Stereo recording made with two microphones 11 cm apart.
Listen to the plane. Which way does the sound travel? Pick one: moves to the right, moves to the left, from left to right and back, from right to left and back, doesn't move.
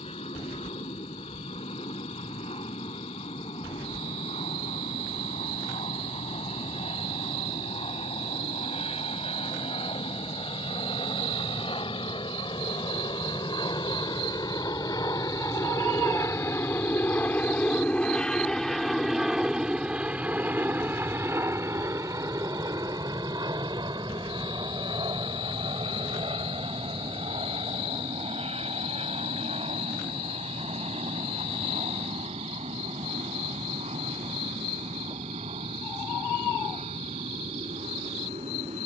moves to the right.